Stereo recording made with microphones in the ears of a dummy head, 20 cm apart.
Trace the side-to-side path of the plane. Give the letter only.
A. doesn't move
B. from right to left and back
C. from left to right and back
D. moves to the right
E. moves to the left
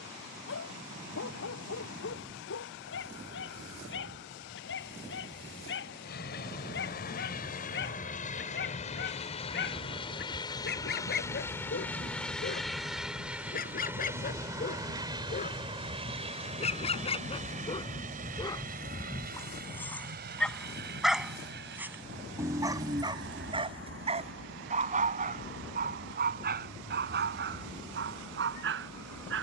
D.